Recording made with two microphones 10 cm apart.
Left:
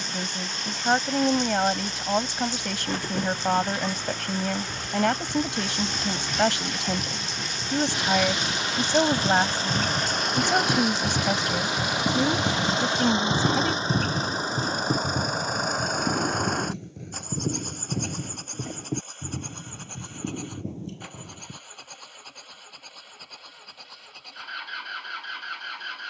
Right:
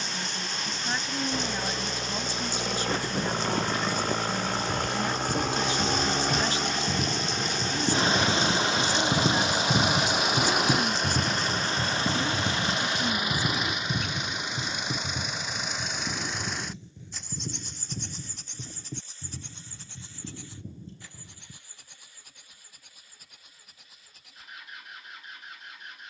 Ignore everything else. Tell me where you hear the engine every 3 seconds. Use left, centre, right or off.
right, right, right, centre, left, left, left, left, left.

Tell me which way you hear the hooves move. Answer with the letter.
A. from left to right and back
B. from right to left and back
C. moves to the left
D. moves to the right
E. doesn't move
C.